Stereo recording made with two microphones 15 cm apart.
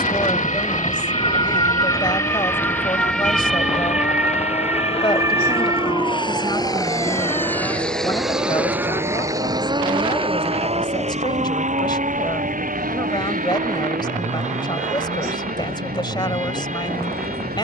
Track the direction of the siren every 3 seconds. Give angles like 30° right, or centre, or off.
30° left, 10° right, 30° right, 40° right, 50° right, 50° right.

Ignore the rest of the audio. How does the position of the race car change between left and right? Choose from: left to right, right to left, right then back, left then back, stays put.
left to right.